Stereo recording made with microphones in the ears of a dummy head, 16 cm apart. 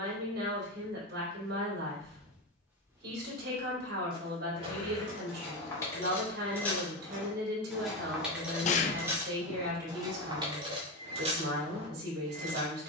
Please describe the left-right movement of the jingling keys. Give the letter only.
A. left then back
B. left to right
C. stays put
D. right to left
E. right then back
B.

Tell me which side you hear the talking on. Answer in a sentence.
You can hear the talking on the right.